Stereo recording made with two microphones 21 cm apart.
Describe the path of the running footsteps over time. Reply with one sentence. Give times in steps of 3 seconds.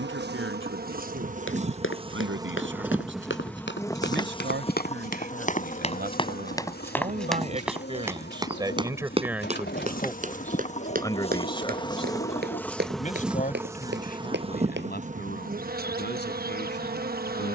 You can hear the running footsteps on the left from 0 s, in the centre from 6 s, on the right from 9 s and not at all from 15 s.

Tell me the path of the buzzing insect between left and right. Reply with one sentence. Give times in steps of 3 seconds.
In this clip you hear the buzzing insect on the right from 0 s, on the left from 3 s, in the centre from 12 s and on the right from 15 s.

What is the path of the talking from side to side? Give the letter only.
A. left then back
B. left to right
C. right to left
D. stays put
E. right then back
C.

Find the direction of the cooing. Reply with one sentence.
You can hear the cooing on the left.